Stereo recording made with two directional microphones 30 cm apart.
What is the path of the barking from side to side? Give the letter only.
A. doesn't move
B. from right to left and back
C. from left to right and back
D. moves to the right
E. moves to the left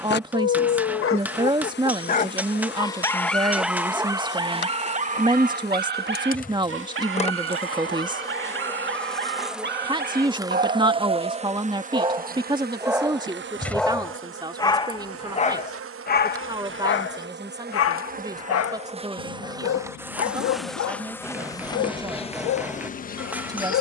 C.